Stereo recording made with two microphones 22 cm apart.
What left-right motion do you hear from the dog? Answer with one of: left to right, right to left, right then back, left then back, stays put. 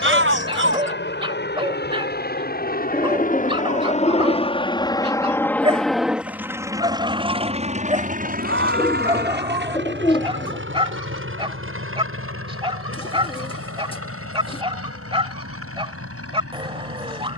stays put.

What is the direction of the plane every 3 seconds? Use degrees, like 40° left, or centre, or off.
50° left, 20° left, 30° right, 60° right, 70° right, 70° right.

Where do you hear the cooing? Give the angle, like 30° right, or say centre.
20° left.